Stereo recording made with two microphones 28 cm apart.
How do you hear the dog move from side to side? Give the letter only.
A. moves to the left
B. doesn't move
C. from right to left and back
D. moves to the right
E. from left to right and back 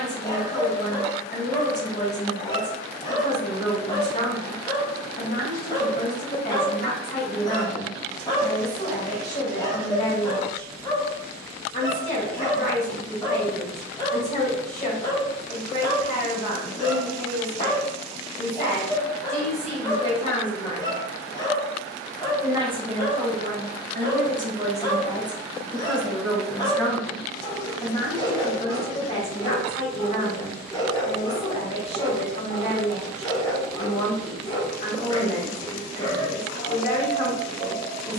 B.